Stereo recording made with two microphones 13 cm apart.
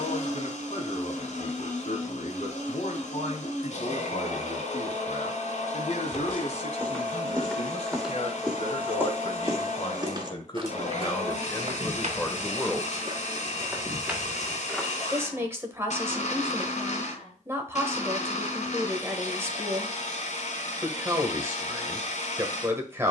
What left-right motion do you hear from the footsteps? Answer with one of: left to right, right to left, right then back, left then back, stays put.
right then back.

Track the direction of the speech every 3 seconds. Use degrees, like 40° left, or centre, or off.
60° left, 60° left, 60° left, 30° left, 10° left, 20° right, 20° right, 20° right.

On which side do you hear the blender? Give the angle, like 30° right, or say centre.
70° left.